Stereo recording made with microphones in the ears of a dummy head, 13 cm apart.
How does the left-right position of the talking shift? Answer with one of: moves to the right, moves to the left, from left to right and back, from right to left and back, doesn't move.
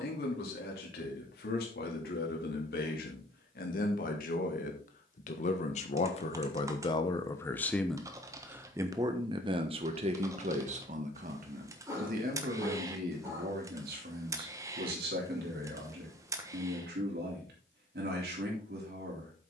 moves to the right.